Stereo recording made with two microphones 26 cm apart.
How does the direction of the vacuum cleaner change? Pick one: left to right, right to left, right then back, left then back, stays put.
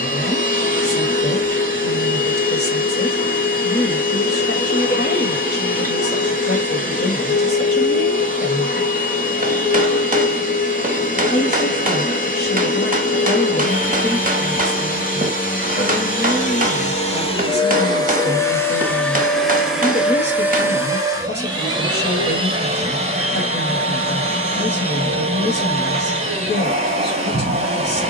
left to right.